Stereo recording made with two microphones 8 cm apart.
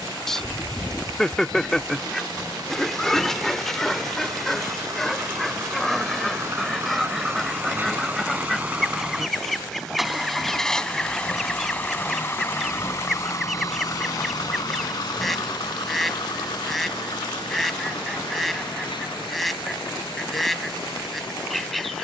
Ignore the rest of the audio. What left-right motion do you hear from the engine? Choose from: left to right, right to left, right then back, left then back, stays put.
right to left.